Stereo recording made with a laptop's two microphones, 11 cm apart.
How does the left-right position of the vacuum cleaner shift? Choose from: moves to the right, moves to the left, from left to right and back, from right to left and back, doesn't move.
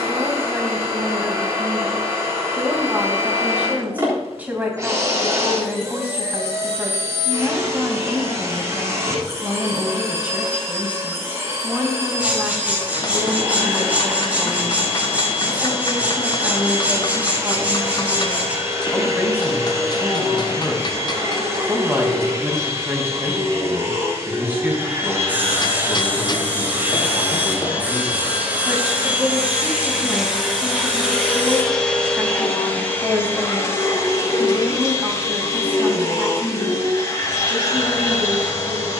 moves to the left.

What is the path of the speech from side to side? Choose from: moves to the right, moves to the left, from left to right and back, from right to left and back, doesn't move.
doesn't move.